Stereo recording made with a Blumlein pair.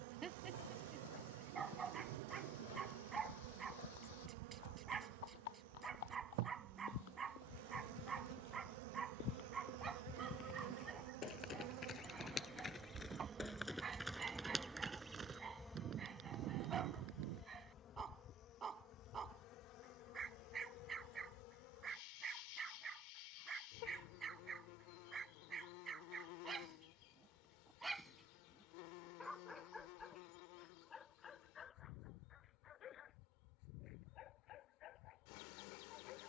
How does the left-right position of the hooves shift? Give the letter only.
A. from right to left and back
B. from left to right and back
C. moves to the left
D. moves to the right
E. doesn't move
D.